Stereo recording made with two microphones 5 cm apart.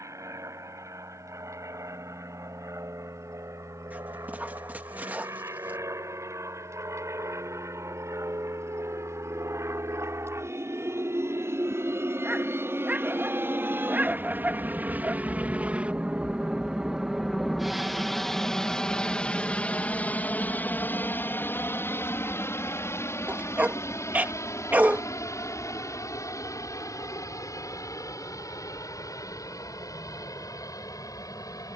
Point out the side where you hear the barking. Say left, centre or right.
right.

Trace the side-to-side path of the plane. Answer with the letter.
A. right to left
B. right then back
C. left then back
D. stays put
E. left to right
A.